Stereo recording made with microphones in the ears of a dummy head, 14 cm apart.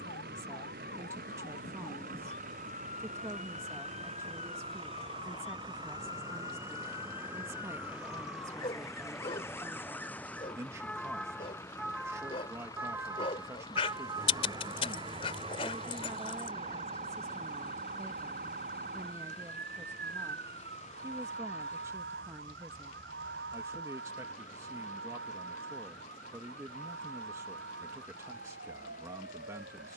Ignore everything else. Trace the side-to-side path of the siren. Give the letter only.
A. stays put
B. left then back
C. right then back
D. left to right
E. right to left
D.